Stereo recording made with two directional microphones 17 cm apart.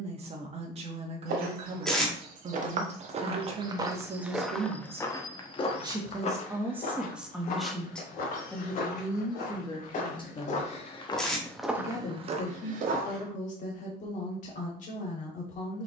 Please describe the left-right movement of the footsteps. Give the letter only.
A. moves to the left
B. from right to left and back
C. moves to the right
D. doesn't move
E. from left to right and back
B.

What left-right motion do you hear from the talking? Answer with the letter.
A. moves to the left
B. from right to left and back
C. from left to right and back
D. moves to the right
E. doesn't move
A.